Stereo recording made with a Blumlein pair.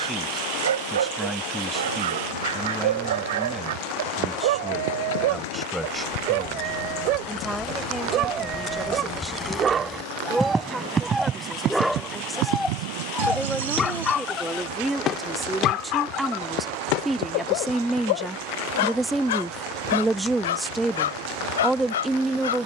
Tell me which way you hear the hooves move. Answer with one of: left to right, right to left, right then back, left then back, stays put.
left to right.